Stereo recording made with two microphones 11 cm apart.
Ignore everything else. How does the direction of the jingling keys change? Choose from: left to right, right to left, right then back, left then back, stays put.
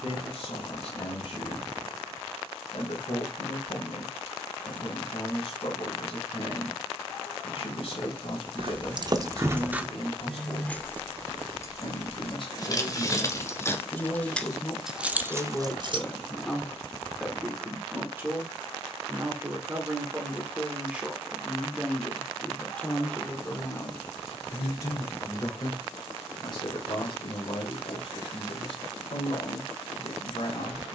left then back.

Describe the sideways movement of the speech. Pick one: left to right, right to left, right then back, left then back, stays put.
right then back.